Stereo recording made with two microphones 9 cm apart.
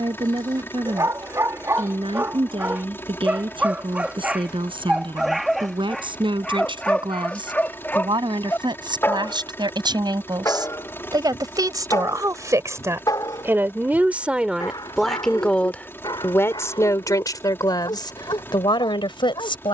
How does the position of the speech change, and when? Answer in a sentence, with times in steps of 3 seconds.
In this clip you hear the speech on the right from 0 s and on the left from 15 s.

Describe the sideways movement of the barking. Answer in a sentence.
In this clip you hear the barking move to the left.